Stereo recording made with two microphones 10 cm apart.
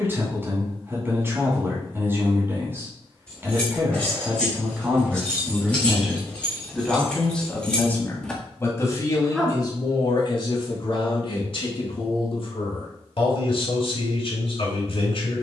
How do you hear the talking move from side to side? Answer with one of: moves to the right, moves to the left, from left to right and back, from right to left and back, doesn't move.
moves to the left.